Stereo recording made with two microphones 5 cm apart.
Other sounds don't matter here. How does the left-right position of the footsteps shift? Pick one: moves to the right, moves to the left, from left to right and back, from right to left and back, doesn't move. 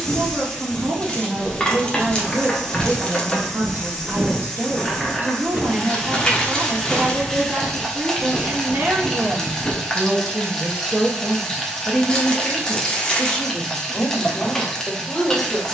from left to right and back.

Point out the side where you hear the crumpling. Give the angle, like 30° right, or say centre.
20° left.